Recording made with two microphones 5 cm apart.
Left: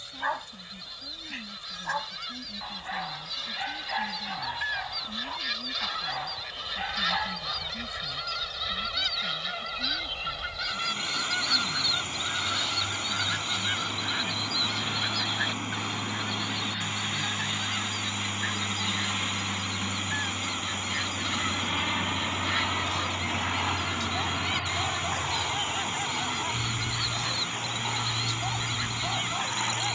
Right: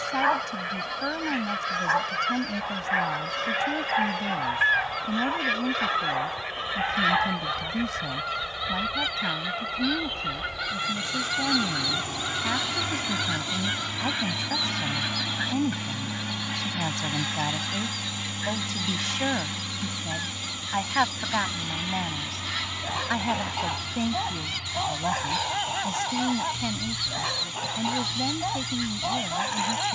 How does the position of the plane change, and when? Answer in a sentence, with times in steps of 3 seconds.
You can hear the plane on the right from 0 s, in the centre from 18 s and on the left from 21 s.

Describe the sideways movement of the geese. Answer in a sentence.
You can hear the geese move from right to left.